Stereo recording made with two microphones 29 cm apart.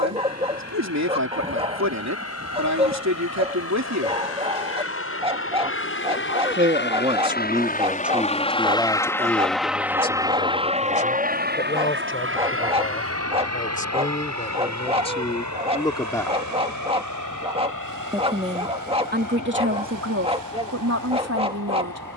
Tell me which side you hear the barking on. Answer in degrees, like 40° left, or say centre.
20° right.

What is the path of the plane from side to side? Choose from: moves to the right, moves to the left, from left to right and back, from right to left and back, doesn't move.
moves to the right.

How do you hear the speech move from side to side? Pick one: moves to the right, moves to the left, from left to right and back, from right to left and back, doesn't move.
from right to left and back.